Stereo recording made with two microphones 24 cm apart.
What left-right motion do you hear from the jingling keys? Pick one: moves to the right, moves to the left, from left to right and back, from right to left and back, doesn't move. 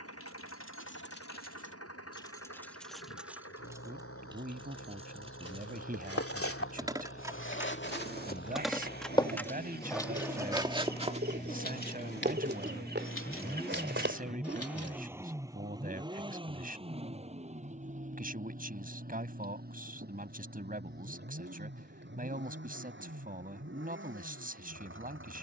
from left to right and back.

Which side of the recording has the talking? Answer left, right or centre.
right.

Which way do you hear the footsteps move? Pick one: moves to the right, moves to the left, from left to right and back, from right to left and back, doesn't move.
moves to the right.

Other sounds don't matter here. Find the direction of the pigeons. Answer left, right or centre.
right.